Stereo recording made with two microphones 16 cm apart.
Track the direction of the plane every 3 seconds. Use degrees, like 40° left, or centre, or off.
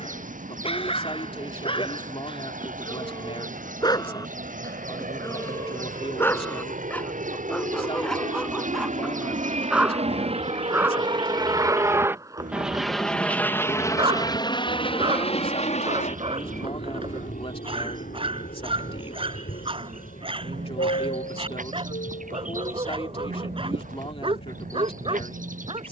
80° right, 80° right, 70° right, 40° right, 10° left, 50° left, 60° left, 70° left, 70° left.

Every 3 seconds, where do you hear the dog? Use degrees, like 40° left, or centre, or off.
40° left, 20° left, 10° left, 10° right, 30° right, 40° right, 40° right, 40° right, 40° right.